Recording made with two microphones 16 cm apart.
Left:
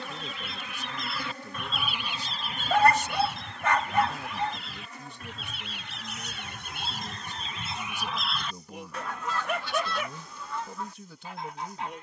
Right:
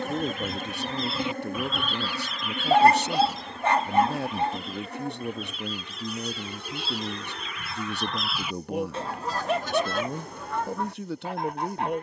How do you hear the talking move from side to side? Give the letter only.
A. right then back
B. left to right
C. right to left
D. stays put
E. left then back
D.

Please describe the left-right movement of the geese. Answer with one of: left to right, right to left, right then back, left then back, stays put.
left then back.